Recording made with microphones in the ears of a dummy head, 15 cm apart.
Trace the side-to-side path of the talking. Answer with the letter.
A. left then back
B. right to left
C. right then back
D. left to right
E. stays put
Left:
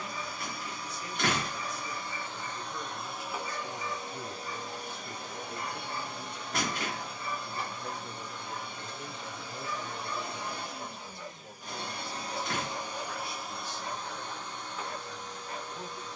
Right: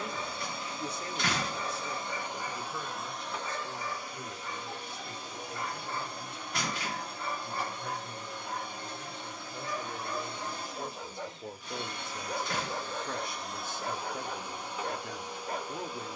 A.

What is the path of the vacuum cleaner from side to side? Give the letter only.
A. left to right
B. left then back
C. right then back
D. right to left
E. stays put
B.